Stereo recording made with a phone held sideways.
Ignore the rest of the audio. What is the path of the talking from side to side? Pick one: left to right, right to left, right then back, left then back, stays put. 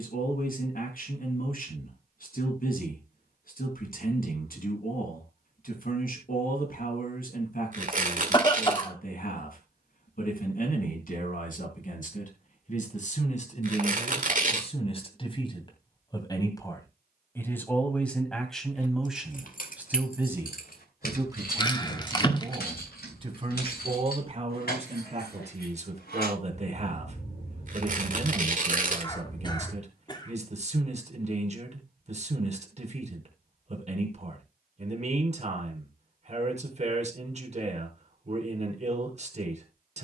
left to right.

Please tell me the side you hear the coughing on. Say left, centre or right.
left.